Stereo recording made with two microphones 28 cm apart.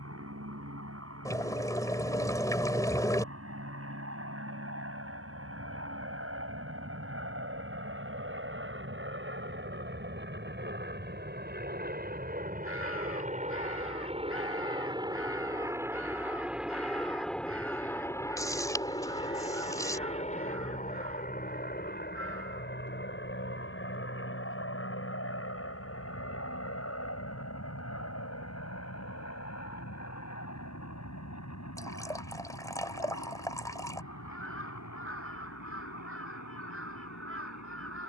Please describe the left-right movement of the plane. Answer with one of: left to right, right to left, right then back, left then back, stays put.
right to left.